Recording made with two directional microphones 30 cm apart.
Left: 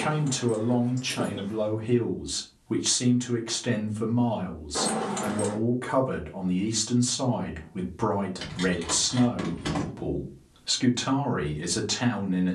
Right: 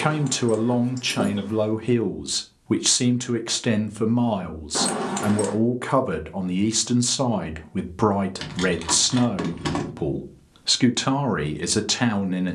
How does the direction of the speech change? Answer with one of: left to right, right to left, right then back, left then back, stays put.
stays put.